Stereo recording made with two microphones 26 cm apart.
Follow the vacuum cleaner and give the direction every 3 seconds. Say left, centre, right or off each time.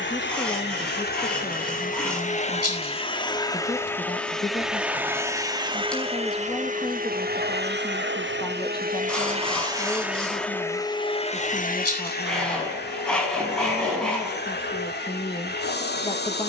left, centre, right, centre, left, left.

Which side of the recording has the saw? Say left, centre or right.
centre.